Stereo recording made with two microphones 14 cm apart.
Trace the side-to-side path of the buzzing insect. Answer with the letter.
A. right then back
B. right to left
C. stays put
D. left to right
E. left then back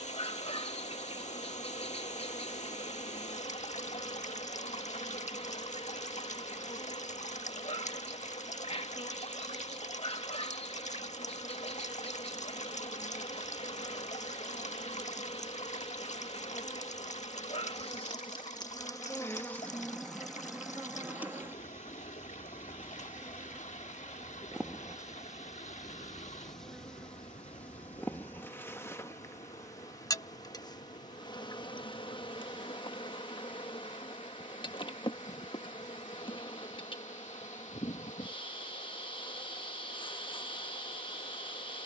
A.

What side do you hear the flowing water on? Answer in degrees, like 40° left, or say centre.
60° left.